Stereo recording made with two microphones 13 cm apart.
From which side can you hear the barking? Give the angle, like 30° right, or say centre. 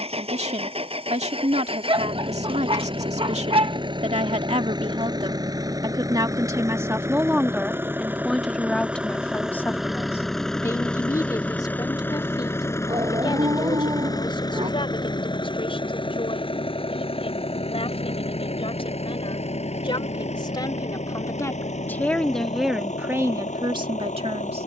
40° right.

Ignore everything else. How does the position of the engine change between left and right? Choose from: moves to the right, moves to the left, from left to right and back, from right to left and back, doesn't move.
moves to the left.